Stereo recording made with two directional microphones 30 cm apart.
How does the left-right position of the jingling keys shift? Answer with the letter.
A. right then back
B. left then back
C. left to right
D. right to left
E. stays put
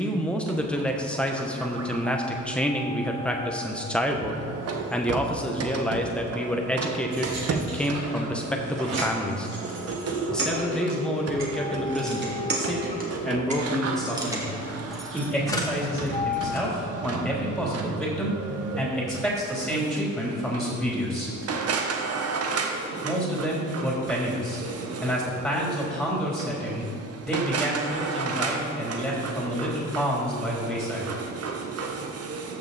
D.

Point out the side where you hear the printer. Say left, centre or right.
right.